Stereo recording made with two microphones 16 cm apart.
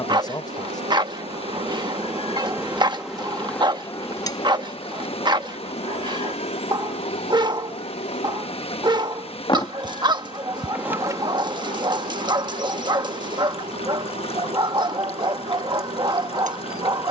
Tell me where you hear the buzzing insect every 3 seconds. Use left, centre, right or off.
right, left, left, centre, right, right.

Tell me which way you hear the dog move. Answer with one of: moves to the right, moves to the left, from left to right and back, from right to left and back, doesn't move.
doesn't move.